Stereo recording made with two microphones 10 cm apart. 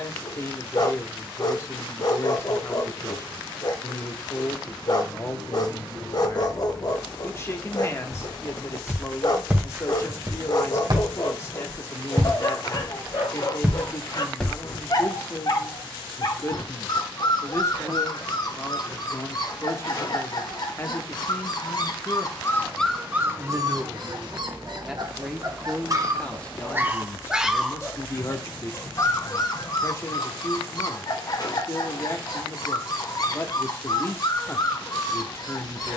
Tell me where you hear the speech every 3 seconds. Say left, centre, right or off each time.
left, left, left, left, left, left, left, centre, centre, left, left, left.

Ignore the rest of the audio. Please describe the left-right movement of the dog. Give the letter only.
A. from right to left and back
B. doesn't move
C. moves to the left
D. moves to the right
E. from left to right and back
E.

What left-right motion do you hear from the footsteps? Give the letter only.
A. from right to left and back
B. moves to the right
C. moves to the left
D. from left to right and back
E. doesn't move
D.